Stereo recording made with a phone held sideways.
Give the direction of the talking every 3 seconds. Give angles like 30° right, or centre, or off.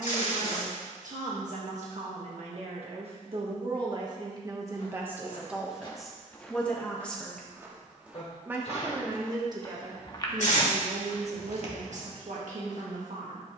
60° right, 30° right, centre, 50° right, 70° right.